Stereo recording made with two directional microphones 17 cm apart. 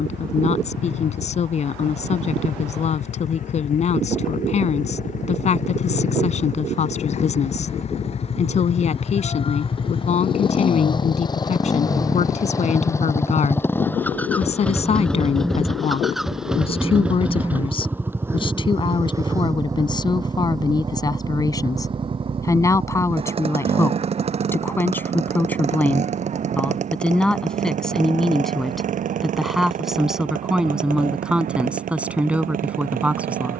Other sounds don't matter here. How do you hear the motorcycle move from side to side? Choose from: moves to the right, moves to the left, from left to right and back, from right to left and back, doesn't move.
moves to the right.